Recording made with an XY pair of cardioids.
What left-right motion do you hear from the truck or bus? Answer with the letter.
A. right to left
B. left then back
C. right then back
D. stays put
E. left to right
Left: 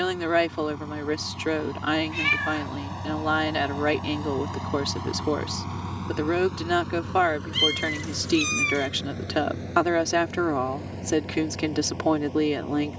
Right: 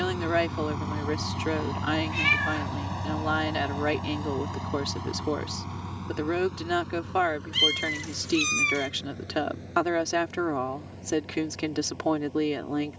A.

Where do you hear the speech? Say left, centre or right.
left.